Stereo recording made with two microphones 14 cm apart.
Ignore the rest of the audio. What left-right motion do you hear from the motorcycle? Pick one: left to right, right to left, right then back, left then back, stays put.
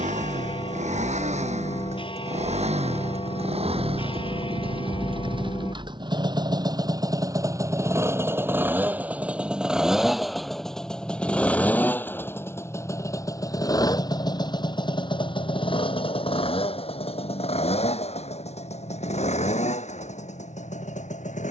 right to left.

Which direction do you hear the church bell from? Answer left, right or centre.
left.